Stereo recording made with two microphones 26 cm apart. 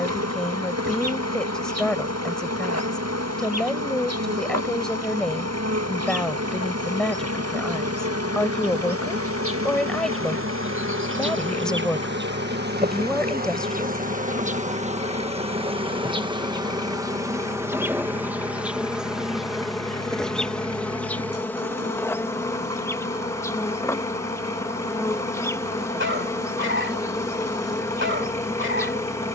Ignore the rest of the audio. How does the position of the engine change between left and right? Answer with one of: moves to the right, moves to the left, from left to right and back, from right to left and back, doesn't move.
doesn't move.